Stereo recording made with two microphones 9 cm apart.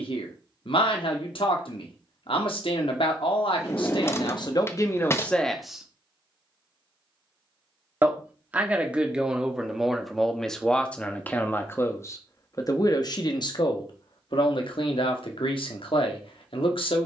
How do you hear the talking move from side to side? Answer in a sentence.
You can hear the talking move from left to right and back again.